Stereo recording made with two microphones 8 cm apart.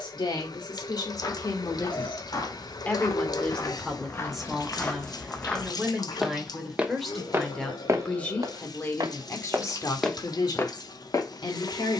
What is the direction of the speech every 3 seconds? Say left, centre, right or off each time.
left, centre, centre, left.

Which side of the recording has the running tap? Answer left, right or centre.
left.